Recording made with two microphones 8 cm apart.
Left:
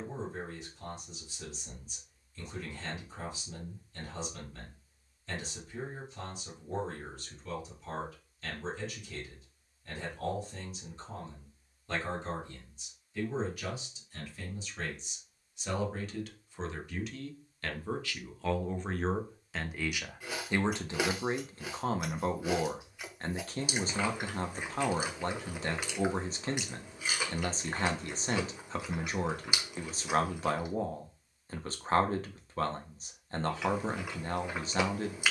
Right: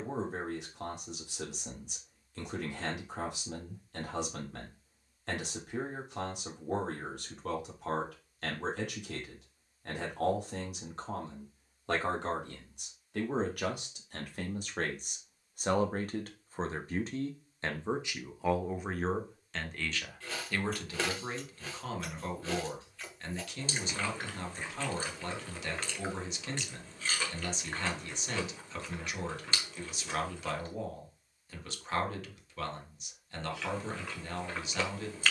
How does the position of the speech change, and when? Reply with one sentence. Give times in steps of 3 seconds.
In this clip you hear the speech on the right from 0 s, in the centre from 18 s and on the left from 21 s.